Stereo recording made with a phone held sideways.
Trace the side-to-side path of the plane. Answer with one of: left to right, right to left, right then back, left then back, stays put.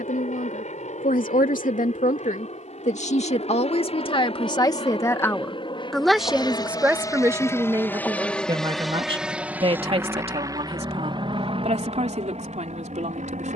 left to right.